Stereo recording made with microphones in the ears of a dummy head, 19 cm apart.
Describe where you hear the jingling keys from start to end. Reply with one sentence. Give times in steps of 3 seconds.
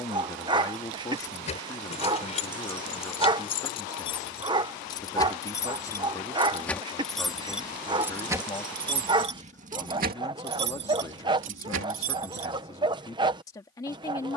In this clip you hear the jingling keys on the left from 0 s, in the centre from 6 s and on the right from 9 s.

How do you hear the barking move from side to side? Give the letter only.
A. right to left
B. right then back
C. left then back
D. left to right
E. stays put
E.